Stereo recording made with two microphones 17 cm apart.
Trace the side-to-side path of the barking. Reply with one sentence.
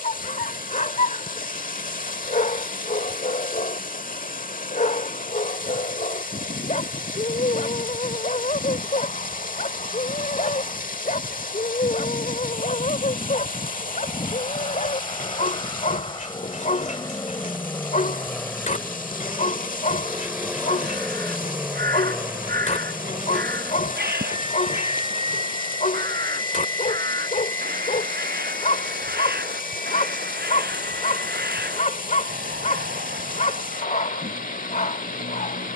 In this clip you hear the barking stay put.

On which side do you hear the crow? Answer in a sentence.
In this clip you hear the crow on the right.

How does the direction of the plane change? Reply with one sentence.
In this clip you hear the plane go from the left side to the right.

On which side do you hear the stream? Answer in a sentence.
In this clip you hear the stream on the left.